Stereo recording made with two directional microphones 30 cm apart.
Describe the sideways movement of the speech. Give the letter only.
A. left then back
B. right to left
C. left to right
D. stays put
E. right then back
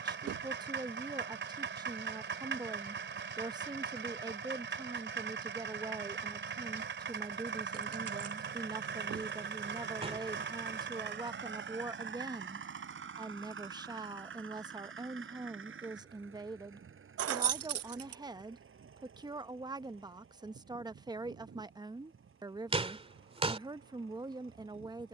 D.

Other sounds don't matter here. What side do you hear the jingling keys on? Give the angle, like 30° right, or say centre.
60° right.